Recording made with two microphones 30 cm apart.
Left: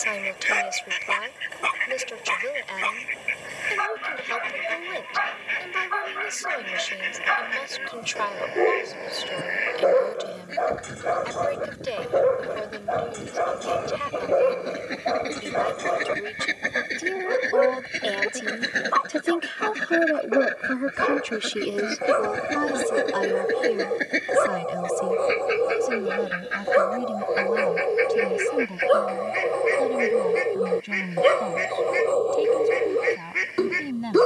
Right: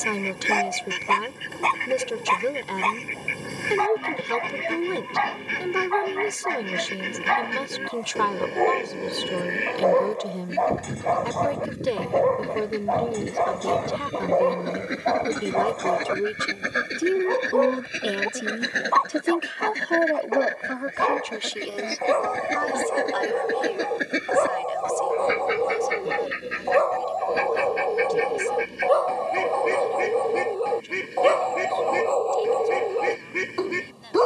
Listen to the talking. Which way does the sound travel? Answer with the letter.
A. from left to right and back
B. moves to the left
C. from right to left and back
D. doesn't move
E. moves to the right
B.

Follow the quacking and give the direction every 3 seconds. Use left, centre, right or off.
right, right, right, right, right, centre, centre, centre, right, right, right, right.